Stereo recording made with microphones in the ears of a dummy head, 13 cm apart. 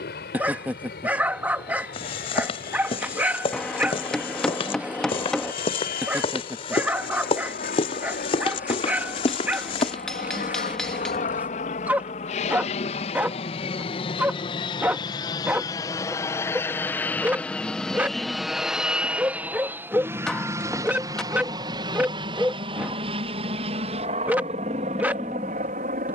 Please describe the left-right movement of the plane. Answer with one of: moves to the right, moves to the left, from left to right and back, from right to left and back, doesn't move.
moves to the right.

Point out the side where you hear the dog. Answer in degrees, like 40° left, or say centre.
10° right.